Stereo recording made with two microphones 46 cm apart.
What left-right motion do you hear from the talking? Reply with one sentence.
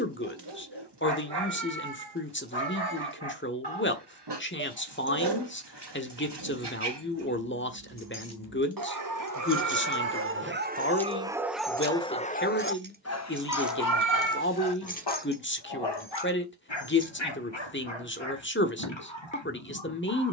You can hear the talking stay in one place.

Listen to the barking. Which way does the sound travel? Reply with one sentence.
In this clip you hear the barking move from right to left.